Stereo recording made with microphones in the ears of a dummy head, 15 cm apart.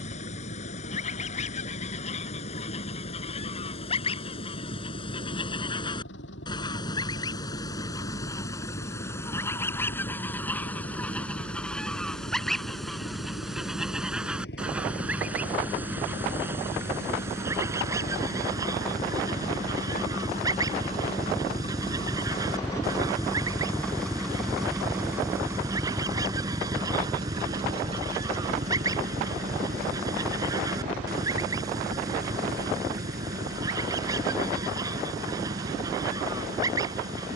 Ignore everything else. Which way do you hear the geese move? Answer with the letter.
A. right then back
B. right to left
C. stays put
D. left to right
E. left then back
D.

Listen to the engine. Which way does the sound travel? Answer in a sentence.
You can hear the engine travel towards the right.